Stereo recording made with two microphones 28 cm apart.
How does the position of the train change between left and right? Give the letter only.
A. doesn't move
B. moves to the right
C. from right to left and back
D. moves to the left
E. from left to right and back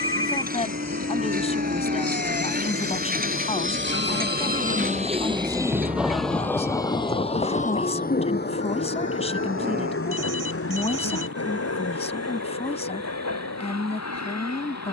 D.